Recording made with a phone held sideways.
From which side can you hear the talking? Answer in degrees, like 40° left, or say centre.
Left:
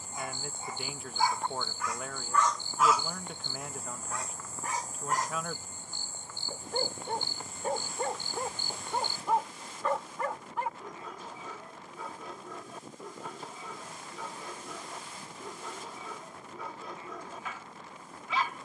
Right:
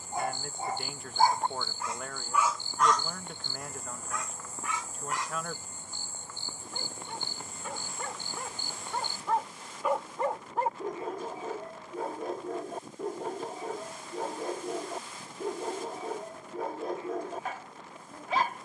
centre.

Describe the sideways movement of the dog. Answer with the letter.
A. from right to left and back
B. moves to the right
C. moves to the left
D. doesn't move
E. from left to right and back
A.